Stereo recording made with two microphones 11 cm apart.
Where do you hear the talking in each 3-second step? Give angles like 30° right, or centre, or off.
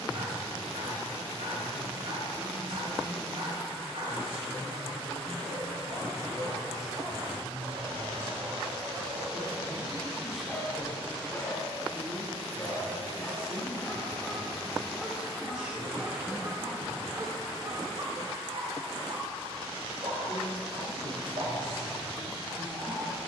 60° right, 60° right, 30° right, centre, centre, 20° right, 60° right, 60° right.